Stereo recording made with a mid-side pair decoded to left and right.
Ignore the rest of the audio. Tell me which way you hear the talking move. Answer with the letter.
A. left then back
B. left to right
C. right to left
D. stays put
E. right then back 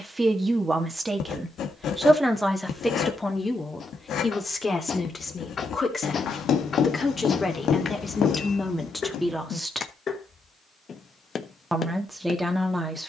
A.